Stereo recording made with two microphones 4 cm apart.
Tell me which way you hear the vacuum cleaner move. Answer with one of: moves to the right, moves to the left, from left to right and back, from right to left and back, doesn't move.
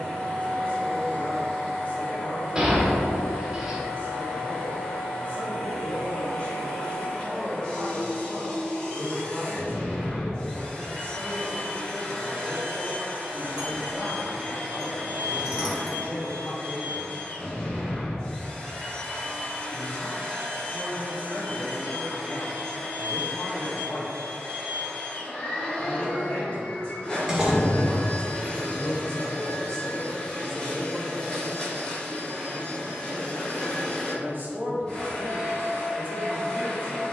doesn't move.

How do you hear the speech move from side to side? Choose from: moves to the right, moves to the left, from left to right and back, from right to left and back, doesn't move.
moves to the right.